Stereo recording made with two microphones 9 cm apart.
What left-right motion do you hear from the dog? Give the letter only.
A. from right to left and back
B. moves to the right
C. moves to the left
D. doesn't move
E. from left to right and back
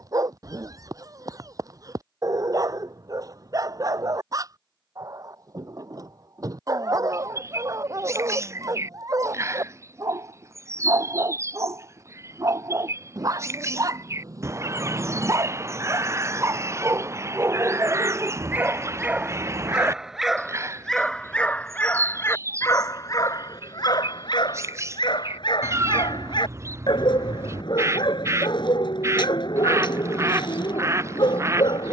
C.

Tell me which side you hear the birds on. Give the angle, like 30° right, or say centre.
30° right.